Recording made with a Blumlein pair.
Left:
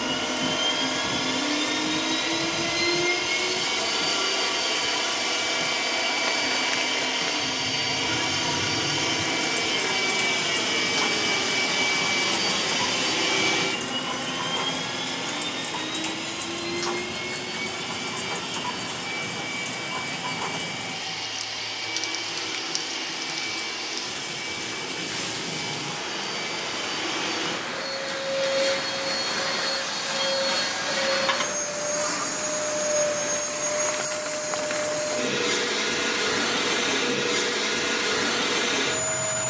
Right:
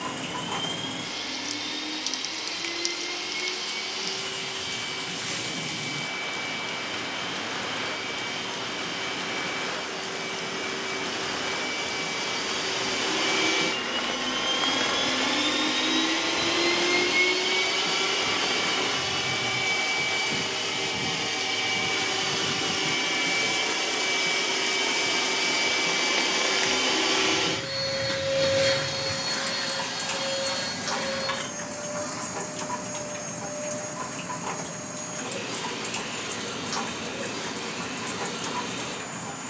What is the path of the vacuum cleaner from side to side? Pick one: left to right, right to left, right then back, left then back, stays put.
right then back.